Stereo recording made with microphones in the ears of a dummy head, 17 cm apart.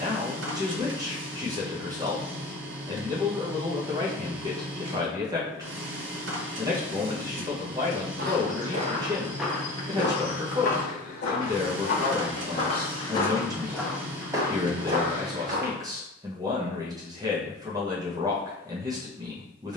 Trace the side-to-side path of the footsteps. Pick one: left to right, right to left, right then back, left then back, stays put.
left then back.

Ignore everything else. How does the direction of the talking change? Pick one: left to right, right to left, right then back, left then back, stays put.
stays put.